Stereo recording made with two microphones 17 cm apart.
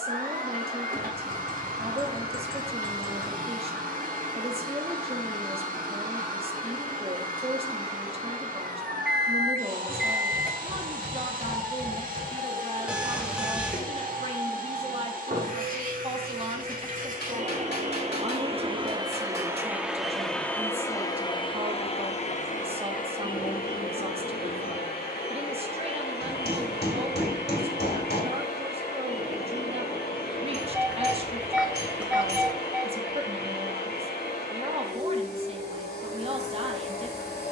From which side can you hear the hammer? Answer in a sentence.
You can hear the hammer on the left.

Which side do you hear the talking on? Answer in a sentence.
You can hear the talking on the right.